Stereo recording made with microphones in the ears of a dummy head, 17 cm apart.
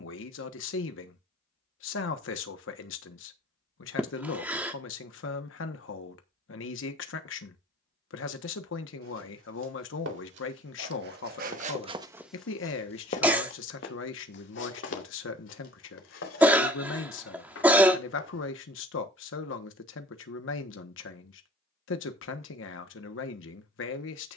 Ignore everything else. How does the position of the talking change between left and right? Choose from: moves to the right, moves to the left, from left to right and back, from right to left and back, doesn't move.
doesn't move.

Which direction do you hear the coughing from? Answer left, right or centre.
centre.